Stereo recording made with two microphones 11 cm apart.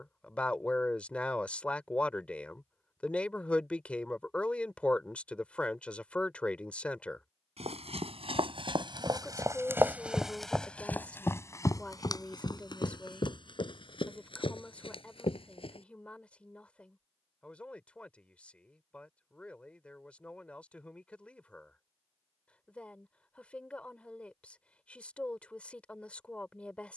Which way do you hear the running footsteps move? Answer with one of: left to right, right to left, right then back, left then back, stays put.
right to left.